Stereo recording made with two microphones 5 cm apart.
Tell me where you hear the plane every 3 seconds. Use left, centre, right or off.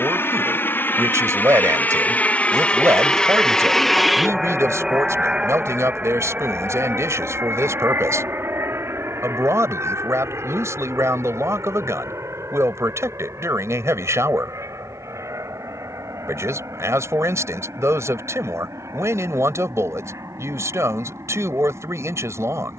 left, centre, right, right, right, right, right, right.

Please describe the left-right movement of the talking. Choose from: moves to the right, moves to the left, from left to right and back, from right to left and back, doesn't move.
doesn't move.